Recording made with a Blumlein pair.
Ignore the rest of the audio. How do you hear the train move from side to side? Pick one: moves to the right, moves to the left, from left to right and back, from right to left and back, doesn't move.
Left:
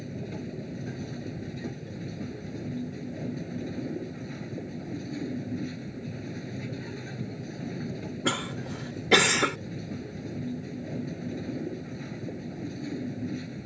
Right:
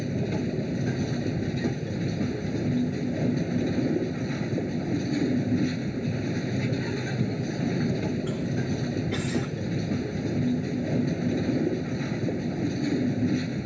doesn't move.